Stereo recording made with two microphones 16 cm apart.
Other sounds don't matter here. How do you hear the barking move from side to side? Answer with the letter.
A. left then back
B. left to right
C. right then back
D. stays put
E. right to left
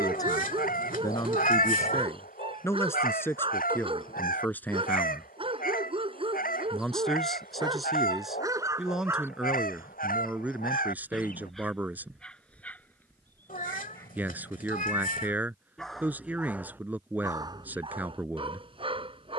A.